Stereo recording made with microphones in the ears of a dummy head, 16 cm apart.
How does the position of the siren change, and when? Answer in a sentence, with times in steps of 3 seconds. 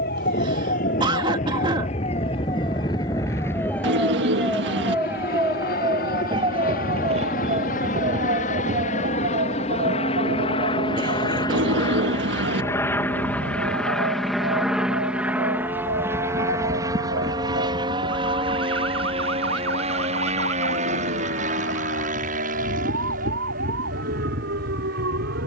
You can hear the siren on the left from 0 s, in the centre from 3 s and on the right from 6 s.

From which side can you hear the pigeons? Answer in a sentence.
You can hear the pigeons on the right.